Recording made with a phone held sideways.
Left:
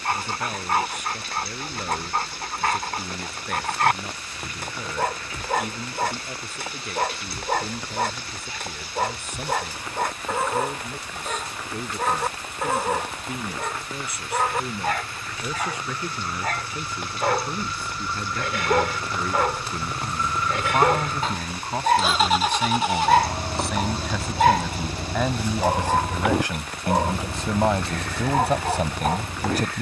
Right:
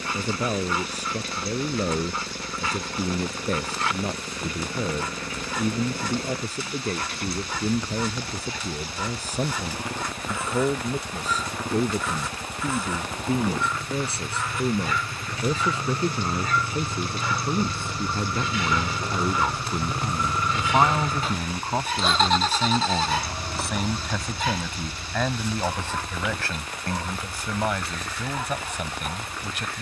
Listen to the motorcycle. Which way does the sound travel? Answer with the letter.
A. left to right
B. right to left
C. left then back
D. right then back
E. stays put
B.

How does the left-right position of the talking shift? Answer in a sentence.
You can hear the talking go from the right side to the left.